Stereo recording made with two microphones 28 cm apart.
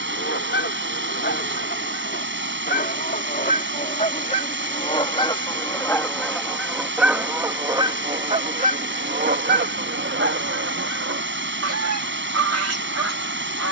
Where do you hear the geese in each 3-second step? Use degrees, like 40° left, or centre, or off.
40° left, 20° left, 10° right, 50° right, 70° right.